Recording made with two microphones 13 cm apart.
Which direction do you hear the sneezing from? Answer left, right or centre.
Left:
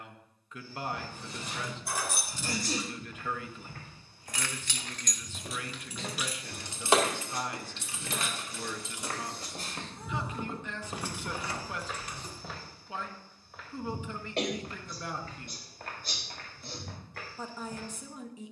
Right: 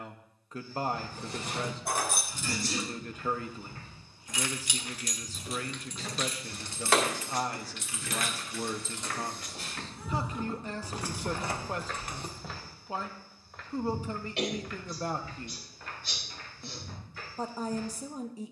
left.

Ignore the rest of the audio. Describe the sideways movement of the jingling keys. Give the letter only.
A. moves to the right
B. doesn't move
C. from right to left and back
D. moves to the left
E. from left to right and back
C.